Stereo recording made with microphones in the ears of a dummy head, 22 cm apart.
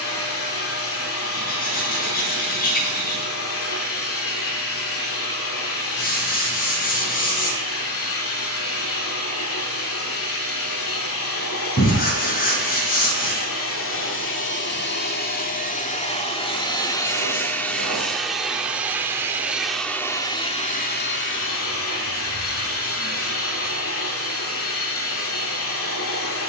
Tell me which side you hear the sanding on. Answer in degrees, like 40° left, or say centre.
40° left.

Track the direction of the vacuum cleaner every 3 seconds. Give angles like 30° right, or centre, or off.
60° left, 60° left, 60° left, 60° left, 60° left, 20° left, 10° left, 60° left, 60° left.